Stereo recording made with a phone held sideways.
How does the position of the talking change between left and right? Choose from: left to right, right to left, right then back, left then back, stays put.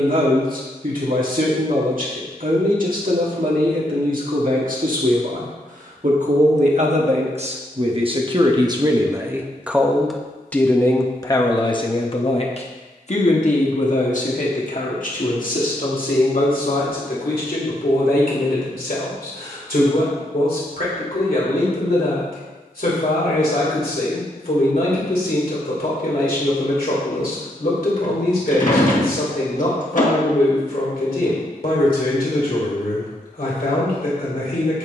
right to left.